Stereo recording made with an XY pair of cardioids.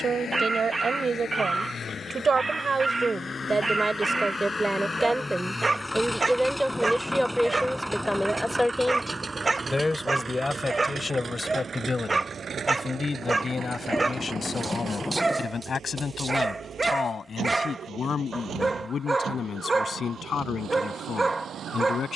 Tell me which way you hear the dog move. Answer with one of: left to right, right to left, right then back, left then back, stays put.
stays put.